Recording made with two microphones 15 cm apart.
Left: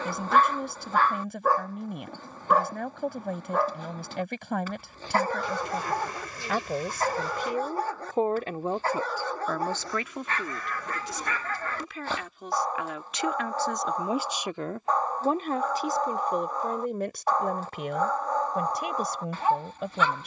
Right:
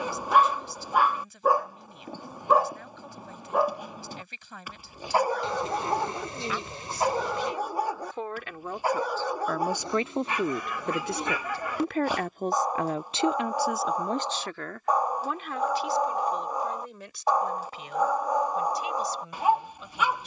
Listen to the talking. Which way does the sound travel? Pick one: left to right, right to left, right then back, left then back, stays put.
right then back.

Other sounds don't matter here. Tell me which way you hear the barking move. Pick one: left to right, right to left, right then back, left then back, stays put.
stays put.